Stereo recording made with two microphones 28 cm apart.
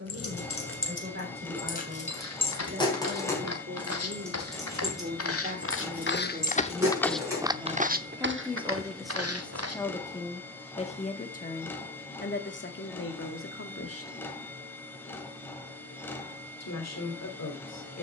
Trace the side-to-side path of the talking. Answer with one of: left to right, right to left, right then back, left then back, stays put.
right to left.